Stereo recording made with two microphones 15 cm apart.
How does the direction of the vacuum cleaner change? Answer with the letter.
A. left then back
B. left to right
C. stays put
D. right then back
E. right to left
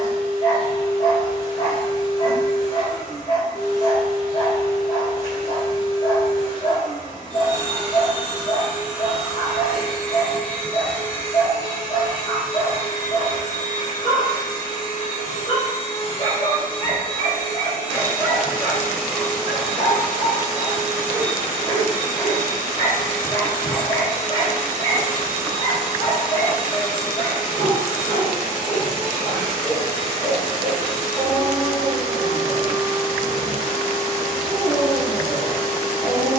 A.